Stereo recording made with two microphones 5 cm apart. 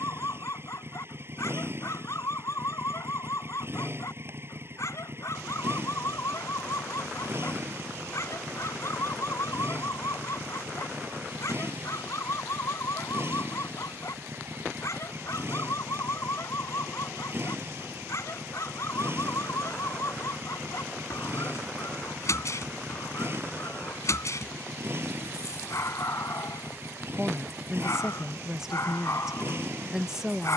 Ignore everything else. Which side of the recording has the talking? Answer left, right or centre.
centre.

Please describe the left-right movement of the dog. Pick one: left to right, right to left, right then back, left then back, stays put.
stays put.